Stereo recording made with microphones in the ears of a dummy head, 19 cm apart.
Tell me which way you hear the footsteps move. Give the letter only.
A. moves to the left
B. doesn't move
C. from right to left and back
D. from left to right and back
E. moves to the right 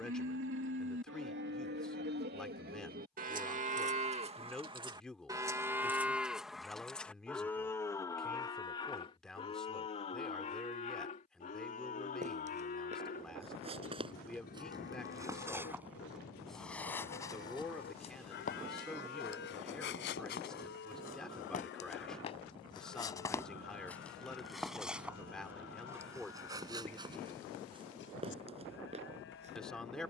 C.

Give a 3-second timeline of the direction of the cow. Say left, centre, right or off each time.
right, right, centre, left, left, left, left, left, left, left.